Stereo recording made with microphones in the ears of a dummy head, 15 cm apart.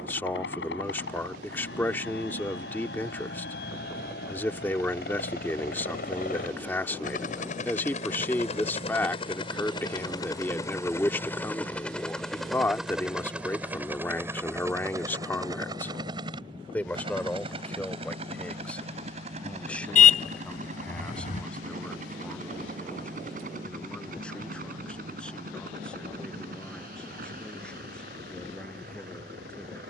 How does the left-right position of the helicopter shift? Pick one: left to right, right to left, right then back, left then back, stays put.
left to right.